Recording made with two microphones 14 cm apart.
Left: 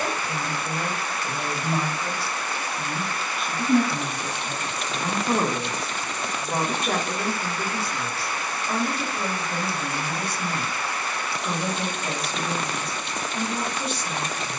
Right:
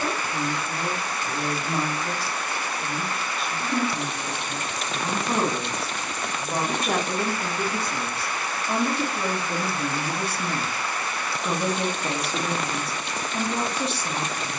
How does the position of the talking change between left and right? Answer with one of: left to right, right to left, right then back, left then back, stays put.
left to right.